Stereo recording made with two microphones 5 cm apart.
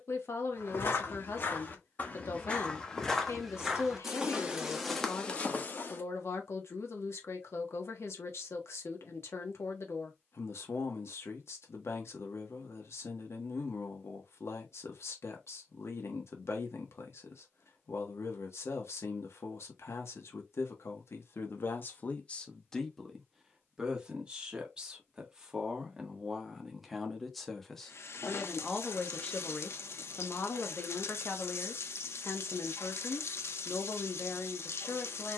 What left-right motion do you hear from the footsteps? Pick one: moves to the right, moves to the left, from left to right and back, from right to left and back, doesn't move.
from left to right and back.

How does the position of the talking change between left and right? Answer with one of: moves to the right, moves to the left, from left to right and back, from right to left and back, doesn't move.
from left to right and back.